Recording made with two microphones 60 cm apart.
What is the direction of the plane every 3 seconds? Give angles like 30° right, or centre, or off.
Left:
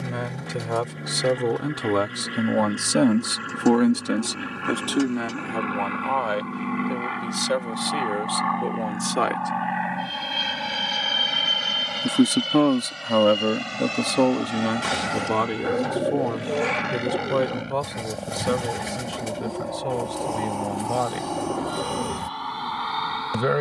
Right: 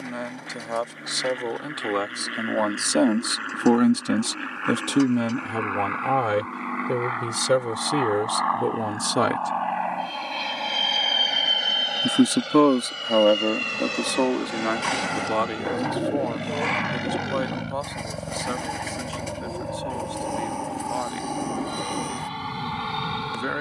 70° left, 70° left, 60° left, 40° left, 20° left, 10° right, 30° right, 40° right.